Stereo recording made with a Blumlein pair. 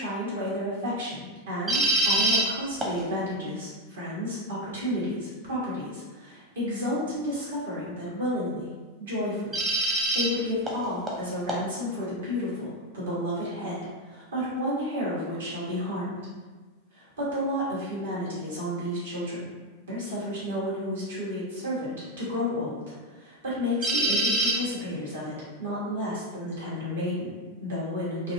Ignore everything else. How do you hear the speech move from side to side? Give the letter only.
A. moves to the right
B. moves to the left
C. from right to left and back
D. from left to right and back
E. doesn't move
E.